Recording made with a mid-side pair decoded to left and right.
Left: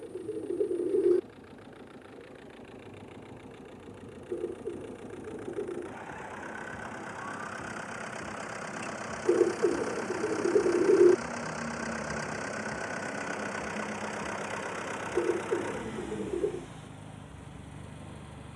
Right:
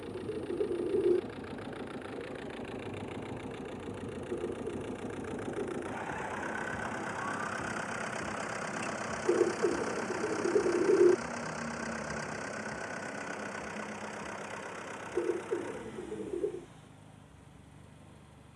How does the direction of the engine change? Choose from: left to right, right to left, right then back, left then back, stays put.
right to left.